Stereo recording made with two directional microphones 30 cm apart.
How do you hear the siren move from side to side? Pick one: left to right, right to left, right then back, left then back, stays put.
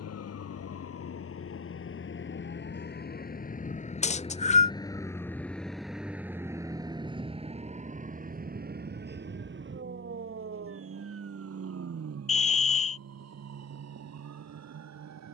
left to right.